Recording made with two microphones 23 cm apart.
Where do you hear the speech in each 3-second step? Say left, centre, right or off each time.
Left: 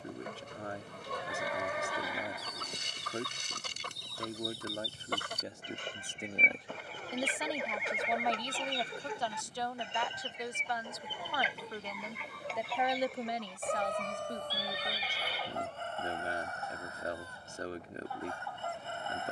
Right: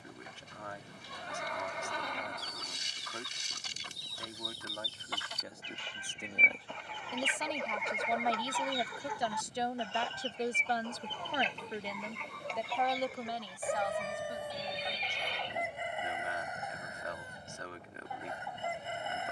left, left, centre, right, left, left, left.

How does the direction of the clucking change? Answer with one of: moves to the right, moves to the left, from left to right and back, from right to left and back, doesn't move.
moves to the right.